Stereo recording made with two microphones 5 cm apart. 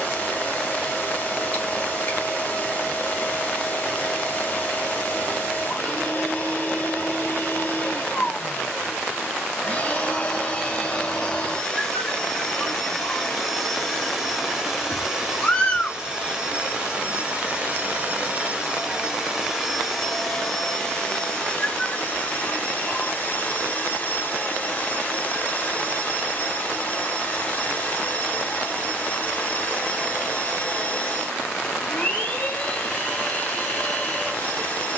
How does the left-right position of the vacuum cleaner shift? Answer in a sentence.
You can hear the vacuum cleaner go right and come back.